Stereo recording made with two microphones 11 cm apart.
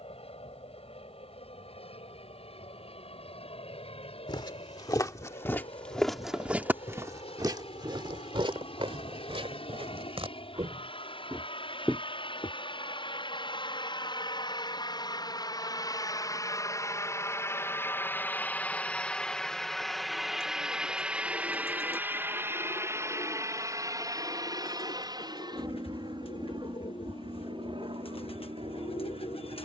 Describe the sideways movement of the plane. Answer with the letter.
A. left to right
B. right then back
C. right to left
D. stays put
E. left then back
A.